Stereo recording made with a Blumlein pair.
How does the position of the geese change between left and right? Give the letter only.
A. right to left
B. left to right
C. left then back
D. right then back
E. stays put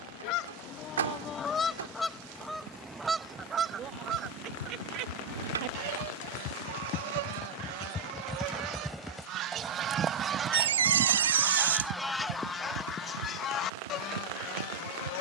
D.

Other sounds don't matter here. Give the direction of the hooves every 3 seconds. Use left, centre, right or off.
off, left, left, right, right.